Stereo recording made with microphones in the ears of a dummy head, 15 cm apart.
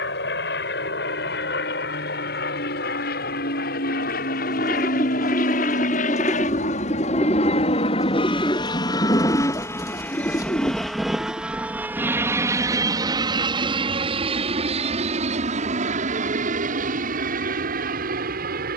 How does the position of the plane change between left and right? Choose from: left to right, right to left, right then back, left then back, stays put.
left to right.